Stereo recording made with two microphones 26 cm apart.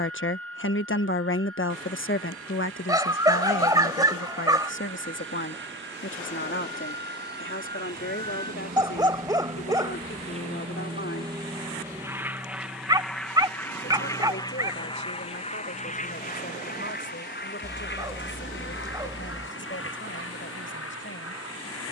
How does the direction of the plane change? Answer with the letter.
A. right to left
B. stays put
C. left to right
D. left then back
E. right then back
A.